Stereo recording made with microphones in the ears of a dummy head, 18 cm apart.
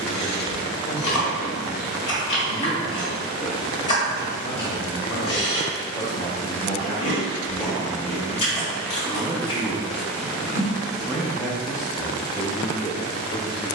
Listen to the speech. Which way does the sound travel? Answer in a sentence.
In this clip you hear the speech go right and come back.